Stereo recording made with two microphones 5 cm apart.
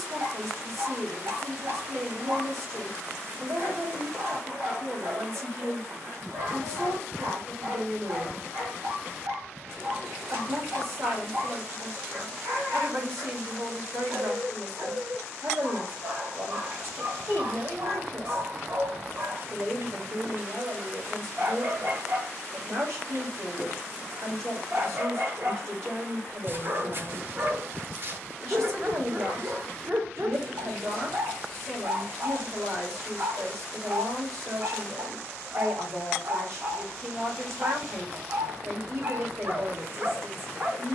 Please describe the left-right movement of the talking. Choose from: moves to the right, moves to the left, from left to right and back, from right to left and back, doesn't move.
doesn't move.